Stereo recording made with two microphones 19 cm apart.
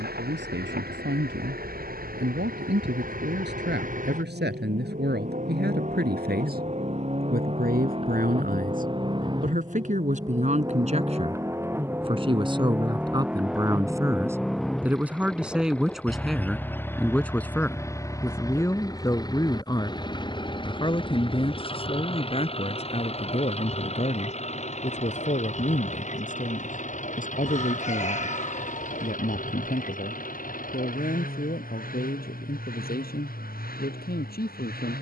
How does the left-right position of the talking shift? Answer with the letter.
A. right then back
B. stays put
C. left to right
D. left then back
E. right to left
E.